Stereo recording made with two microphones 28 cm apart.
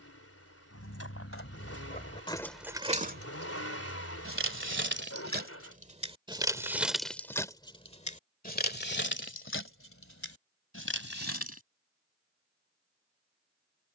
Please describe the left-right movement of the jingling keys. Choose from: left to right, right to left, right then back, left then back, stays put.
right then back.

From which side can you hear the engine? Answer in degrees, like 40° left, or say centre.
60° left.